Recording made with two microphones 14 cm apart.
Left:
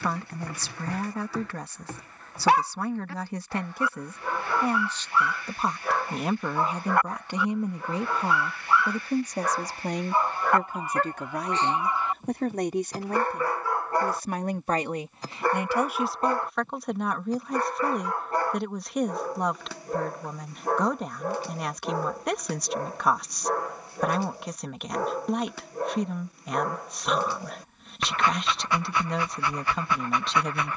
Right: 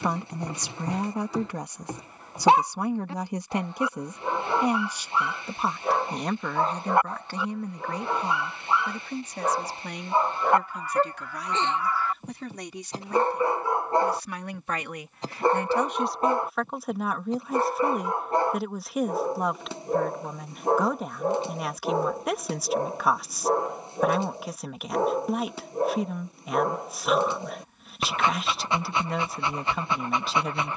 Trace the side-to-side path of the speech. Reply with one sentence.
You can hear the speech go left and come back.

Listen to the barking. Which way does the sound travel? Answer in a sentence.
You can hear the barking stay put.